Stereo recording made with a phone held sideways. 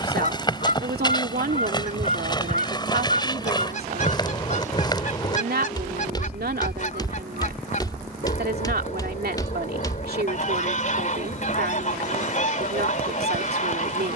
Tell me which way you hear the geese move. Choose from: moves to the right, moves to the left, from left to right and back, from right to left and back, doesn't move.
doesn't move.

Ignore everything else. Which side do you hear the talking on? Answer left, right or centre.
right.